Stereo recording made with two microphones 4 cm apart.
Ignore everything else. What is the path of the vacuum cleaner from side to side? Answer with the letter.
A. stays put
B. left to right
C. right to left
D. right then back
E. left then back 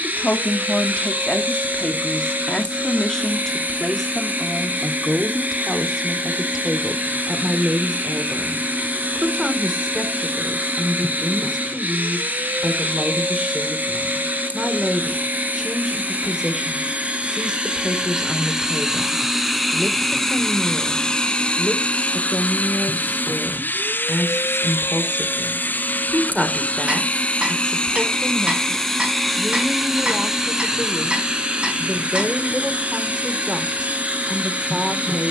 E.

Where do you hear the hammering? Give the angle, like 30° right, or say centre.
30° right.